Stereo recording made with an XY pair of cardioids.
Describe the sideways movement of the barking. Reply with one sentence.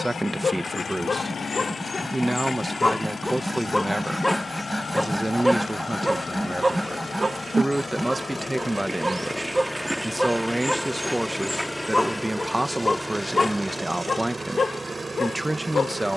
You can hear the barking go right and come back.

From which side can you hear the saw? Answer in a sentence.
In this clip you hear the saw in the centre.